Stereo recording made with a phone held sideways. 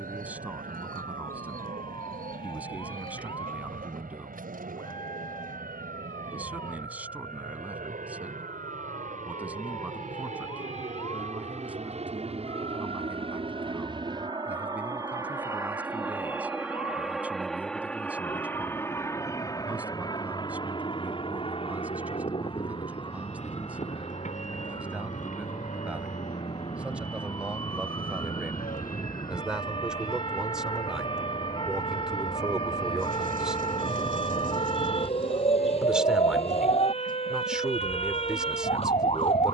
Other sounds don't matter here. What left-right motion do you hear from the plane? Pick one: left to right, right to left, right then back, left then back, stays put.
right to left.